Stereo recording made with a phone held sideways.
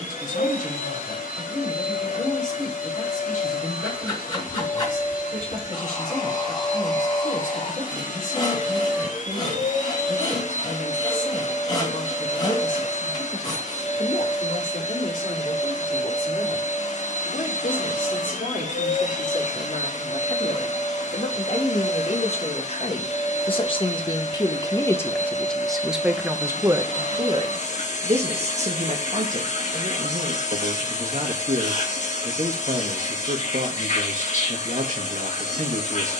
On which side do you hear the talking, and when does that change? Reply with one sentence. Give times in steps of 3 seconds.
In this clip you hear the talking on the left from 0 s, in the centre from 24 s and on the right from 27 s.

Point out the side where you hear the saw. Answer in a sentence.
In this clip you hear the saw on the left.